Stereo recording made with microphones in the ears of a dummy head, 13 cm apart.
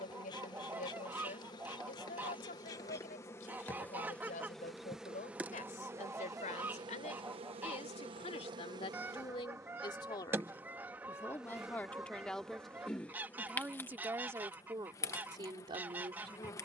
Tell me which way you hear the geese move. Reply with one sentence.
In this clip you hear the geese stay put.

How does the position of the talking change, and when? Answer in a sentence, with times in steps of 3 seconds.
In this clip you hear the talking on the left from 0 s, in the centre from 12 s and on the right from 15 s.